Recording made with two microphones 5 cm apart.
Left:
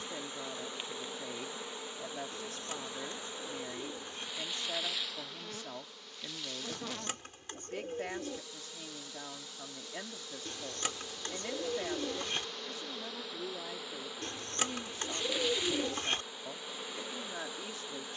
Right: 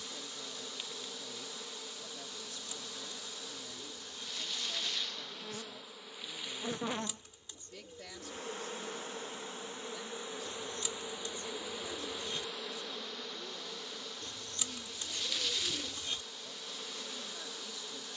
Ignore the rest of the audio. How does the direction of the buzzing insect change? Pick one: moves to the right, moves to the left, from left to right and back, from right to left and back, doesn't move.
from left to right and back.